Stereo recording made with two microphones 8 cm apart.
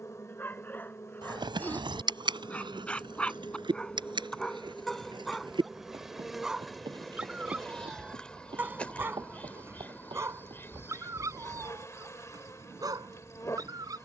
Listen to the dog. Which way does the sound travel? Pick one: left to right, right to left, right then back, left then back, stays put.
left to right.